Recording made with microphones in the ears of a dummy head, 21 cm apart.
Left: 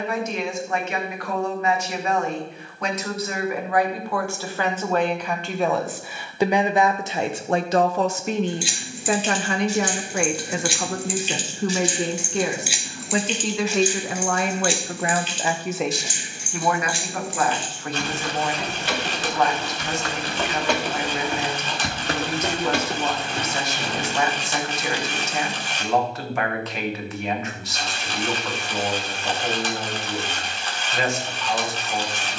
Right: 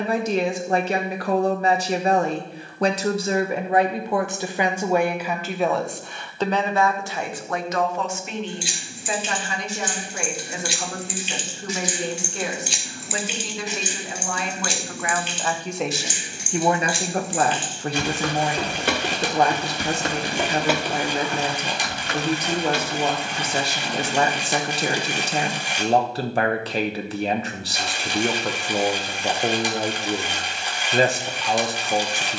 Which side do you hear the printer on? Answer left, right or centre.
centre.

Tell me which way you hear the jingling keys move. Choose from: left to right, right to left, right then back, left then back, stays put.
right then back.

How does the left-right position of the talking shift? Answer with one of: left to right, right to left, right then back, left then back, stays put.
left then back.